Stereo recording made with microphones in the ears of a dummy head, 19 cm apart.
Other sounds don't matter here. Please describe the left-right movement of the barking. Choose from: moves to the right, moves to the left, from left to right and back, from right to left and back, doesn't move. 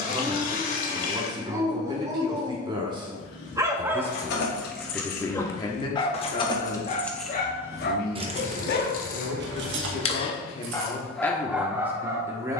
from right to left and back.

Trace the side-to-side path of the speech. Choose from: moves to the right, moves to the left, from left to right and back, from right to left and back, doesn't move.
from right to left and back.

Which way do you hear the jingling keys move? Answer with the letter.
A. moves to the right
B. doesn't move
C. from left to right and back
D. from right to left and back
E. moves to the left
A.